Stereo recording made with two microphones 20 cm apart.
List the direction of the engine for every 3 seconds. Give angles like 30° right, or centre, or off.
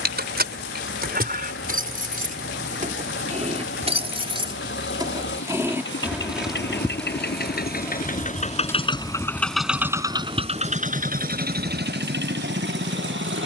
80° left, 70° left, 50° left, 30° right, 60° right.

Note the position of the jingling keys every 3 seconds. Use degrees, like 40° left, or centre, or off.
50° right, 30° right, 10° left, 30° right, off.